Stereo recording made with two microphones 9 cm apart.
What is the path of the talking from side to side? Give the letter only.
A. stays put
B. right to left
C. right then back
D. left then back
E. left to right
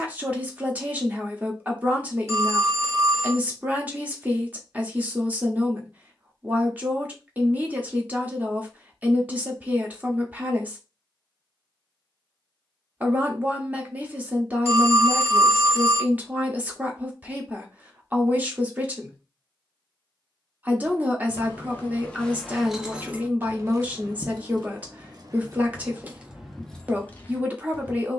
A.